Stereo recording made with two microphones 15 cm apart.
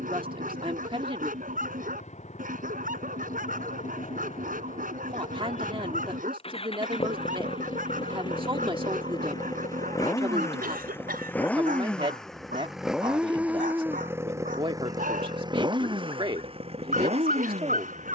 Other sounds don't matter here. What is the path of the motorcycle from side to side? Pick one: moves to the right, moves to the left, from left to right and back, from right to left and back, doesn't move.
moves to the right.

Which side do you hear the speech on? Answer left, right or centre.
right.